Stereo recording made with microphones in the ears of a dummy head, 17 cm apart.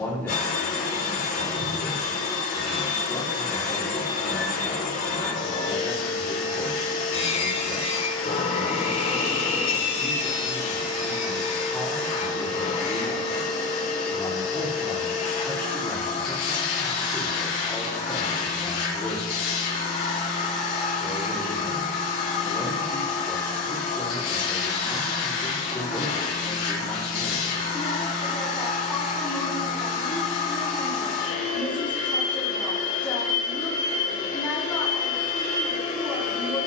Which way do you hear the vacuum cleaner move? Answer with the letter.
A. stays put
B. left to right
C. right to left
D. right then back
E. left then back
A.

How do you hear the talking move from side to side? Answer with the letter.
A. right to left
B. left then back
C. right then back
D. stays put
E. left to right
D.